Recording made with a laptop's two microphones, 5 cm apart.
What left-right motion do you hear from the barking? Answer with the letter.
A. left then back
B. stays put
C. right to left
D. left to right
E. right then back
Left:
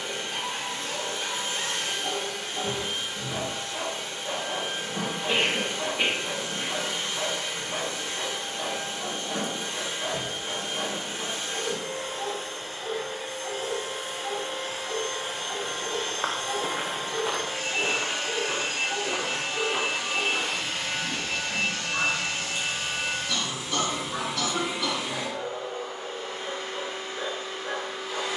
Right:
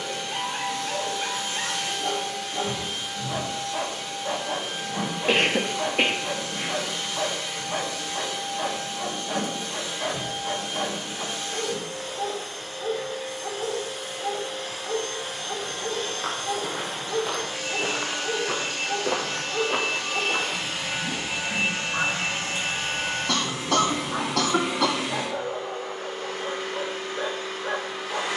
B.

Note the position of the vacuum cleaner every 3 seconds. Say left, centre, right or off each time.
left, left, left, left, left, left, centre, right, right, right.